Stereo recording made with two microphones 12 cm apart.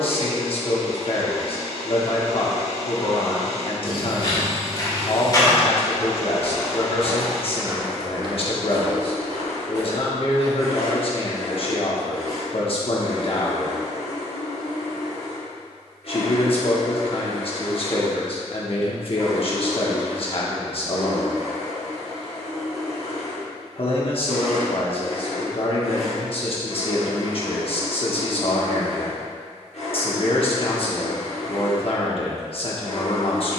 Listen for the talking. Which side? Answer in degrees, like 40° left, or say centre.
50° left.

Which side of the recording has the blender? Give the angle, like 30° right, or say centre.
80° left.